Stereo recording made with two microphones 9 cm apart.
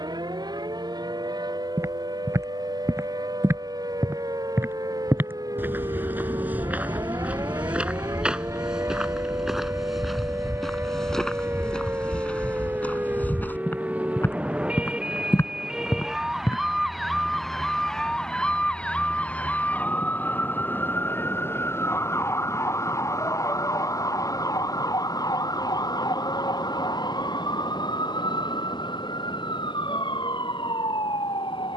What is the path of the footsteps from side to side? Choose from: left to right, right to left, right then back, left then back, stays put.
right to left.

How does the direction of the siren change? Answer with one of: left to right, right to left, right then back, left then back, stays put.
right to left.